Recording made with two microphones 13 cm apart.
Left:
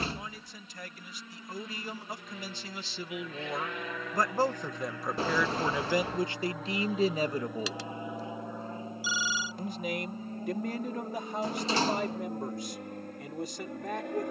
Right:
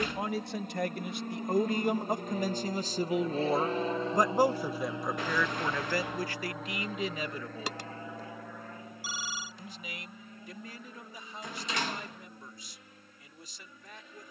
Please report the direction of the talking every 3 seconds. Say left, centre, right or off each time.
right, centre, left, left, left.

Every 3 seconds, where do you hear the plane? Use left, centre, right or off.
right, right, centre, left, left.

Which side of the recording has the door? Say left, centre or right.
left.